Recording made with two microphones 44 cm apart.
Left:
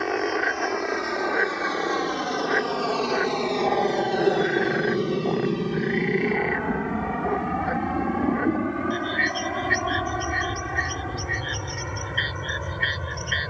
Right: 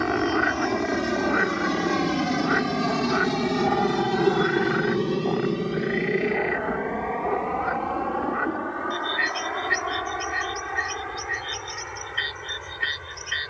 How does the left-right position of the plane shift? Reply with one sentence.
In this clip you hear the plane go from the right side to the left.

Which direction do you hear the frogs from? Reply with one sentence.
You can hear the frogs on the right.